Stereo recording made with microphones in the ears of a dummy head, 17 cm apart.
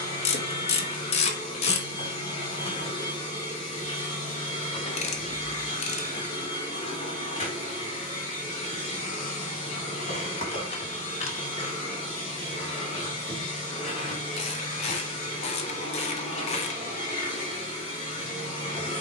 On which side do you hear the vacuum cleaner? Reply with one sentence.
In this clip you hear the vacuum cleaner on the left.